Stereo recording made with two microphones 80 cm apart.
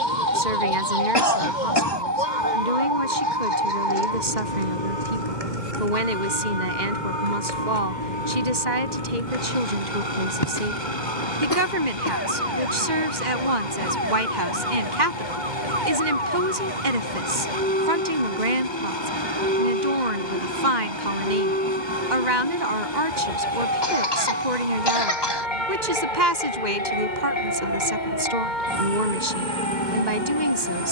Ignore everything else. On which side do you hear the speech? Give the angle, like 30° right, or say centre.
60° right.